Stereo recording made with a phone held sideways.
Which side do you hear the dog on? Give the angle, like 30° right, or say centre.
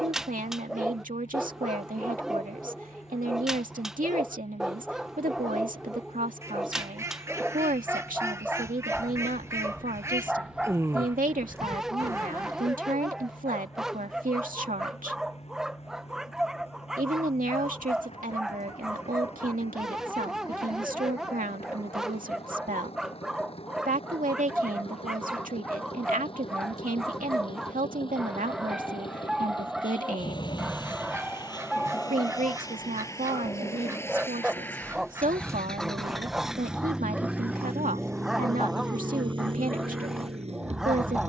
centre.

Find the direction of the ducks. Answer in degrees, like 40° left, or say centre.
20° right.